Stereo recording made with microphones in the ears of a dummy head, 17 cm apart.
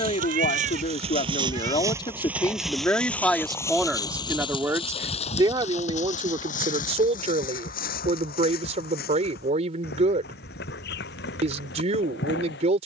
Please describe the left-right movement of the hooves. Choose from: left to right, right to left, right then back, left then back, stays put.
right to left.